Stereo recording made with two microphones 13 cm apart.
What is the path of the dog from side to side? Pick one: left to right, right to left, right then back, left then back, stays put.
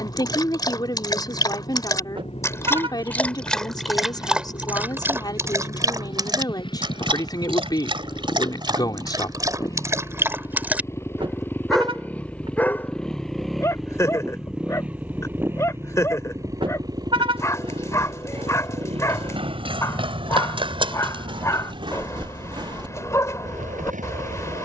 right then back.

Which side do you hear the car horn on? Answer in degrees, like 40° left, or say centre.
40° right.